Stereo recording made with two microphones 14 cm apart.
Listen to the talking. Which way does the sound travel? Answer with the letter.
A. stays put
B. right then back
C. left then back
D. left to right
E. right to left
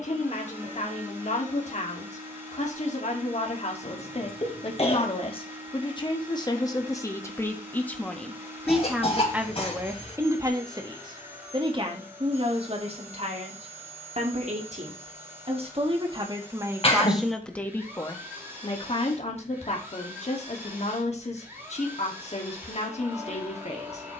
B.